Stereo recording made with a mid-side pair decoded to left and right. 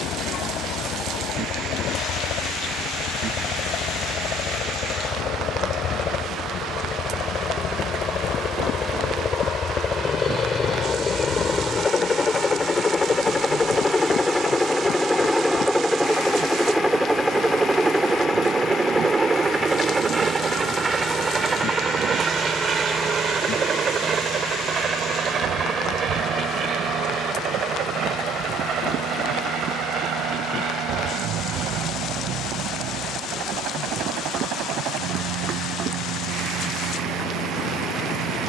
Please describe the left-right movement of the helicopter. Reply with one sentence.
You can hear the helicopter go from the left side to the right.